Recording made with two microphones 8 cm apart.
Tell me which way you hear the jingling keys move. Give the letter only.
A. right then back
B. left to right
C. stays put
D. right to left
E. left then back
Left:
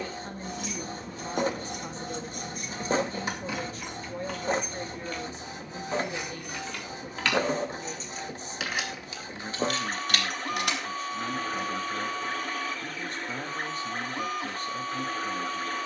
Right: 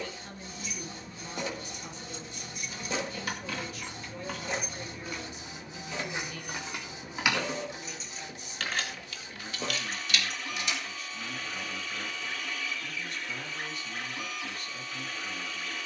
A.